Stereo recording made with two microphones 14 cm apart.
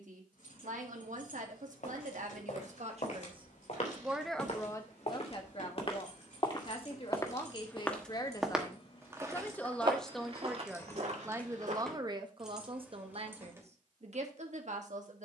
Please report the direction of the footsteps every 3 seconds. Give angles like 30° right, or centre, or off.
60° left, 50° left, 20° left, 40° right, off.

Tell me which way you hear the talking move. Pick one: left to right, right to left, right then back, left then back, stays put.
left then back.